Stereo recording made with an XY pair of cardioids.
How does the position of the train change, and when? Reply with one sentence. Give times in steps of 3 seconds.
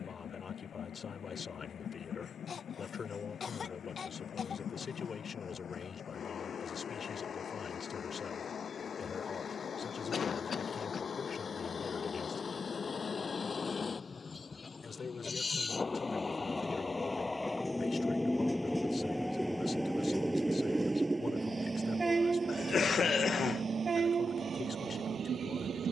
You can hear the train on the left from 0 s, in the centre from 18 s and on the right from 21 s.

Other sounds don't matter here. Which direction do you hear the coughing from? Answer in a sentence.
You can hear the coughing on the left.